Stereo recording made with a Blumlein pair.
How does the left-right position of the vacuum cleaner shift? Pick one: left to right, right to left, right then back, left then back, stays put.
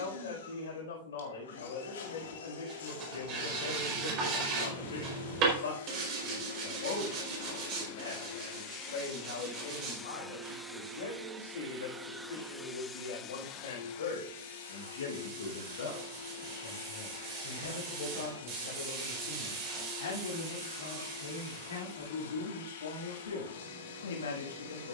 right then back.